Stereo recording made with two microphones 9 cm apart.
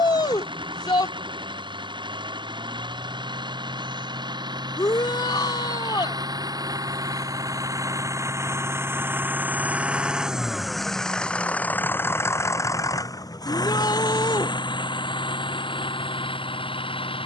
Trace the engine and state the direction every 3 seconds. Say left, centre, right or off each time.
right, right, right, centre, left, left.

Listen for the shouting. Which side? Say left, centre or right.
left.